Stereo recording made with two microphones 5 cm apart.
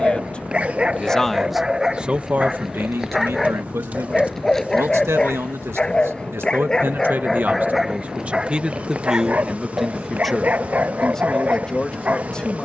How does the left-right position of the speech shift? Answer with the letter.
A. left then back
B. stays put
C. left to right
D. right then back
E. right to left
D.